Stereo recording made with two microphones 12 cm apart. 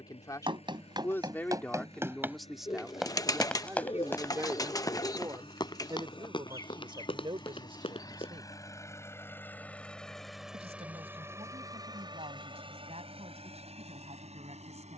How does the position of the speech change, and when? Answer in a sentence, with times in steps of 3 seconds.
You can hear the speech in the centre from 0 s and on the right from 3 s.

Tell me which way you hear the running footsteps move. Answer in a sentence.
In this clip you hear the running footsteps move from right to left.